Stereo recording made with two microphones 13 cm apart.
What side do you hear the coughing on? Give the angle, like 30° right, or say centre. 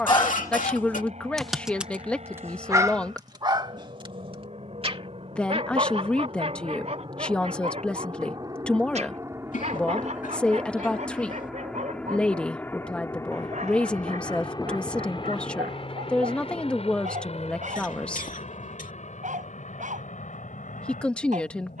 70° left.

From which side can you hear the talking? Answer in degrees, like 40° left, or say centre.
10° left.